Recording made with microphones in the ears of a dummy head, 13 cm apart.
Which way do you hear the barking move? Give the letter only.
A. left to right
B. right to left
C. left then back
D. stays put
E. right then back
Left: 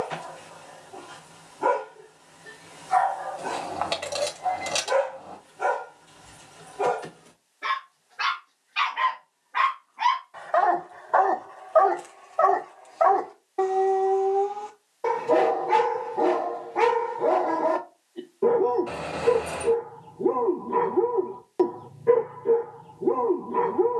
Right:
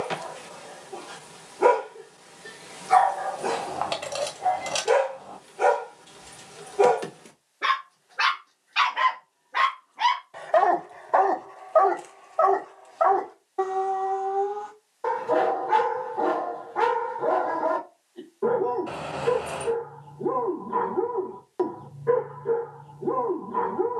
B.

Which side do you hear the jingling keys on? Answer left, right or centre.
centre.